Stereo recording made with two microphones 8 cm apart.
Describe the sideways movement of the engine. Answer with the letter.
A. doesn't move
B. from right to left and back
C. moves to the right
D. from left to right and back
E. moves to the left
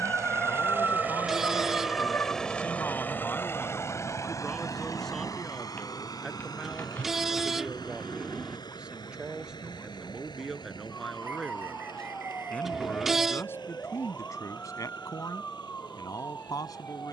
E.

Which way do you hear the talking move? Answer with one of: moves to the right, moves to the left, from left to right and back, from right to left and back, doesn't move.
from left to right and back.